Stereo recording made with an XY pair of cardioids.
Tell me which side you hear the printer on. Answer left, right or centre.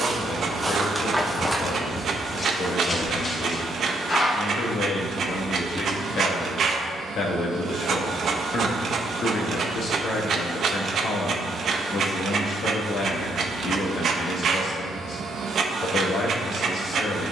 right.